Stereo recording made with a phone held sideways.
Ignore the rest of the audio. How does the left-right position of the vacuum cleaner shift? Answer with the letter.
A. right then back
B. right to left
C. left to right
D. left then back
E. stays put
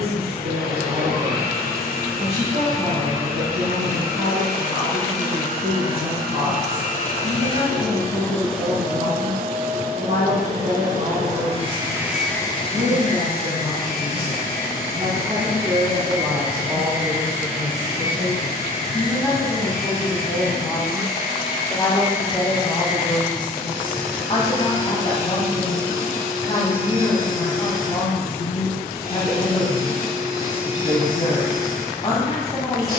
A.